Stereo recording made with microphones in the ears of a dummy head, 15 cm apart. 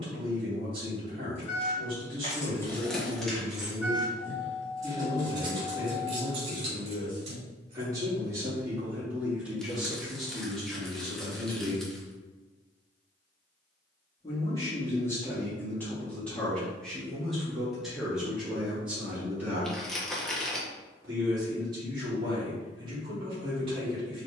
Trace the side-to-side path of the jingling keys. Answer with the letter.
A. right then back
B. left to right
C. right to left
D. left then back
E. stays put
B.